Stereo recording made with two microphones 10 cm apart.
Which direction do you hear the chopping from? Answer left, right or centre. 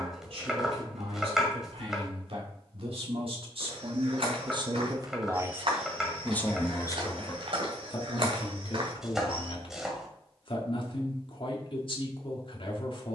centre.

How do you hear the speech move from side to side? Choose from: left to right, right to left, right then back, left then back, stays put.
right to left.